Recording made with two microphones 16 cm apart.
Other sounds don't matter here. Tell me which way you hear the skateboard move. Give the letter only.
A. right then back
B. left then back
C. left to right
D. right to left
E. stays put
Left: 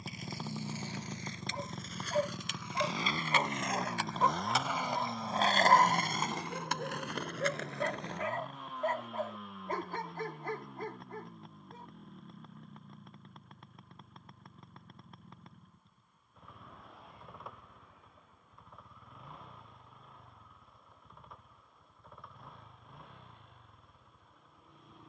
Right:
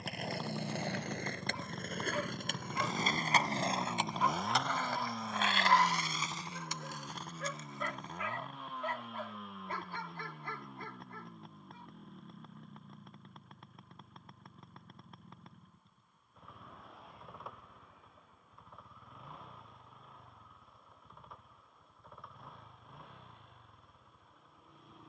D.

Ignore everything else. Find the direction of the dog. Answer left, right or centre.
left.